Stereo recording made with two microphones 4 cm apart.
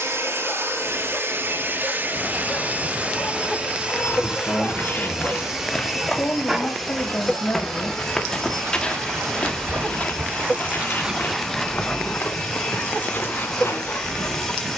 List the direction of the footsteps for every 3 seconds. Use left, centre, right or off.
off, left, centre, left, left.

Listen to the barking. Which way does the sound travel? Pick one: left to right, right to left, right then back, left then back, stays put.
right then back.